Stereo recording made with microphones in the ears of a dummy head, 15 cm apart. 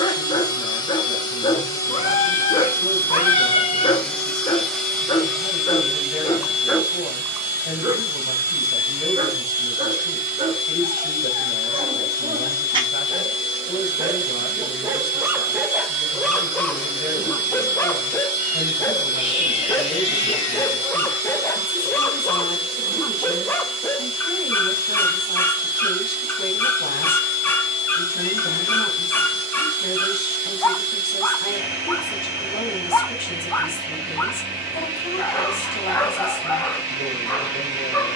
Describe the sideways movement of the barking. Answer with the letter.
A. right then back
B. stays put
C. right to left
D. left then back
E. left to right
A.